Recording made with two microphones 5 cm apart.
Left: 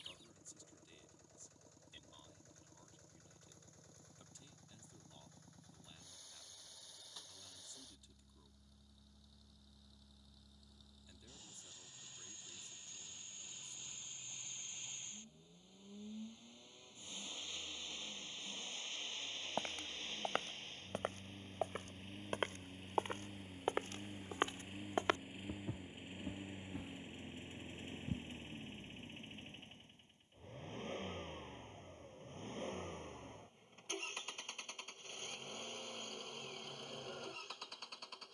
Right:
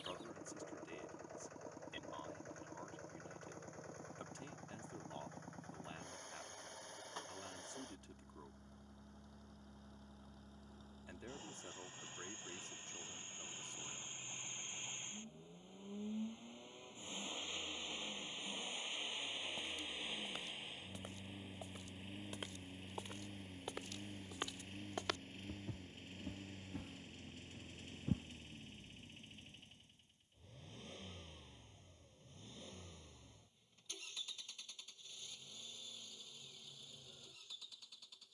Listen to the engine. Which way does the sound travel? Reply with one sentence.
In this clip you hear the engine go from the right side to the left.